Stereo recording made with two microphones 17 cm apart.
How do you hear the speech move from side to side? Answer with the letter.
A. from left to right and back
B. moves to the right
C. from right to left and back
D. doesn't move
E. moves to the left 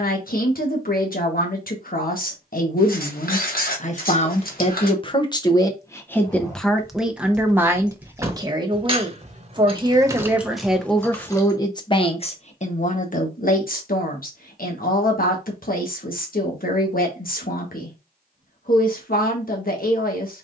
A.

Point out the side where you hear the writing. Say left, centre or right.
left.